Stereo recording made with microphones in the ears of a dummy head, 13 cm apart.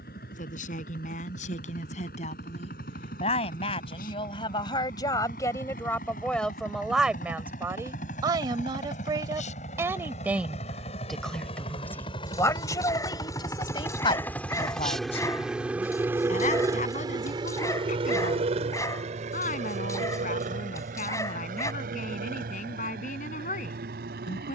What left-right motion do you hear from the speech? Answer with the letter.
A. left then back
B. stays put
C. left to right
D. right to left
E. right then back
E.